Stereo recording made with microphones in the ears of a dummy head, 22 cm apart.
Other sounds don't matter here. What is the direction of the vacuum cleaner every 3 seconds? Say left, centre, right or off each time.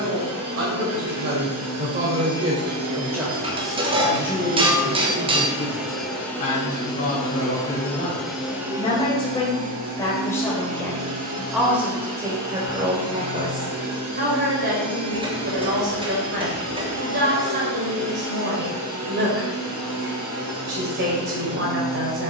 right, right, centre, right, right, right, right, right.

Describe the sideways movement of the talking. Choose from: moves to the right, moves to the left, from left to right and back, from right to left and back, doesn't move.
from right to left and back.